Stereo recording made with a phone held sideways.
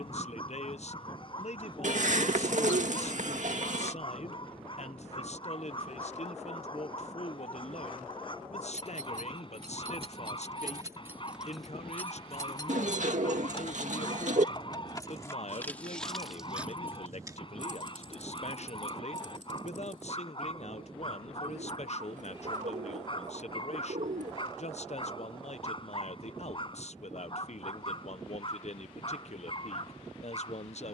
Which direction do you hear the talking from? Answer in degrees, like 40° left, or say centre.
50° left.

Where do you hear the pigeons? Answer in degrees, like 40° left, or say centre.
60° right.